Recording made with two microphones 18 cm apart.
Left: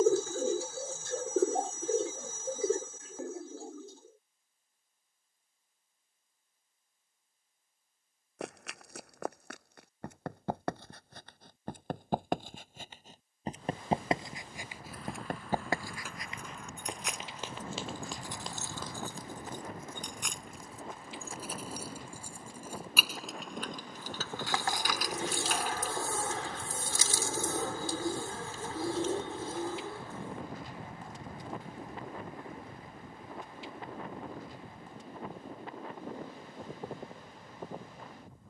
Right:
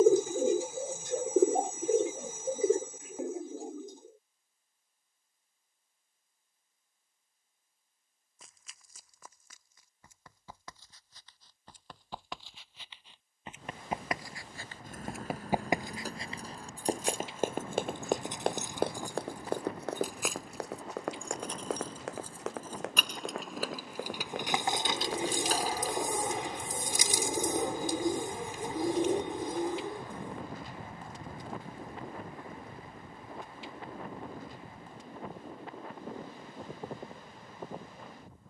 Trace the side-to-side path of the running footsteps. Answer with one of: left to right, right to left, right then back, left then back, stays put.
left to right.